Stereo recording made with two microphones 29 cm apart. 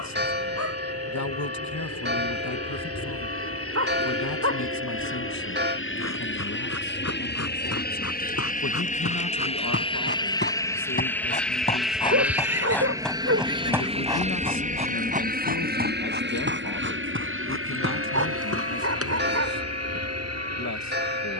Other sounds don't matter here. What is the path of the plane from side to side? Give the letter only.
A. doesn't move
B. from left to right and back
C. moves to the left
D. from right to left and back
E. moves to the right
E.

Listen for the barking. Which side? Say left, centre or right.
right.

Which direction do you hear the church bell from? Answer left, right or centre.
right.